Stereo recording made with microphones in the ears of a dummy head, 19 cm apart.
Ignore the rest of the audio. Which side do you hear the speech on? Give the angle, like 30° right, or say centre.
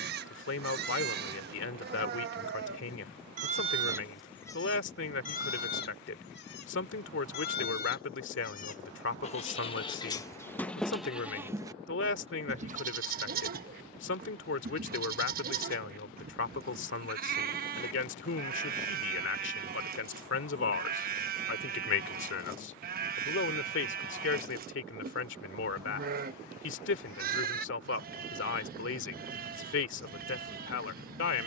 60° left.